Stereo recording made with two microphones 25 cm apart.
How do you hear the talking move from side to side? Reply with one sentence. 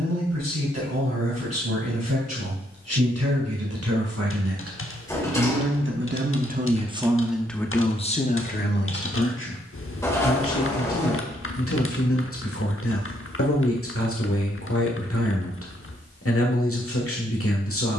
In this clip you hear the talking move to the left.